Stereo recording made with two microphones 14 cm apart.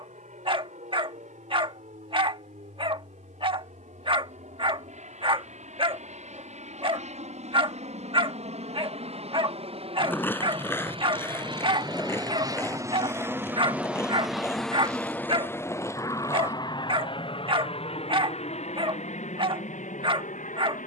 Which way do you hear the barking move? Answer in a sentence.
You can hear the barking stay put.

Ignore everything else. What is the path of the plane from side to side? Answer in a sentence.
In this clip you hear the plane travel towards the left.